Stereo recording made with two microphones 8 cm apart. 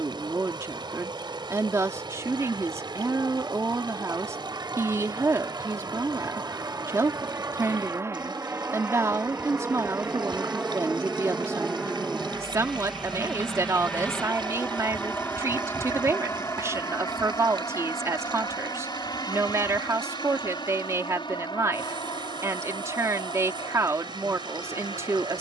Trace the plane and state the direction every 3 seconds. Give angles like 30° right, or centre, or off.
60° right, 50° right, 40° right, 20° right, 10° left, 30° left, 50° left, 60° left, 70° left.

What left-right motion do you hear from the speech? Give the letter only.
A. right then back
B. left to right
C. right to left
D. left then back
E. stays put
E.